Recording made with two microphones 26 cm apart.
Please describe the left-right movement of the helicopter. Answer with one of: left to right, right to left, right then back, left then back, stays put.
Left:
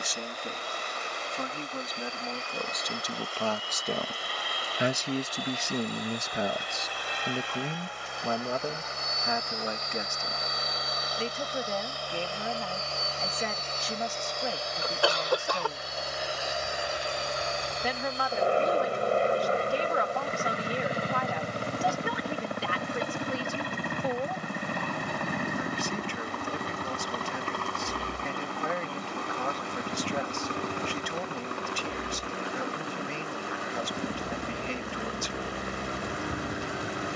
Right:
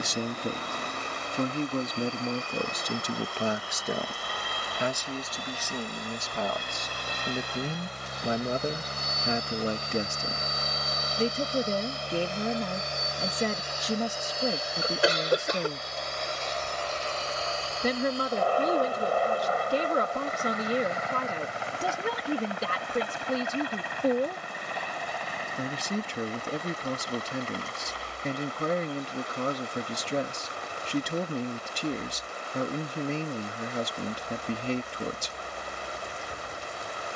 right to left.